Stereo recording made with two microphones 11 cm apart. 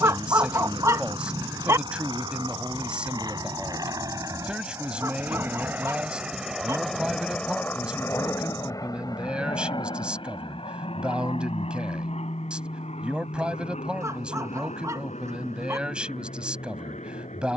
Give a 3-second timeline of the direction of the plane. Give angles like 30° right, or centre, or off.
50° right, 30° right, 10° left, 50° left, 70° left, 80° left.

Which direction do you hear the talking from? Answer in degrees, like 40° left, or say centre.
10° right.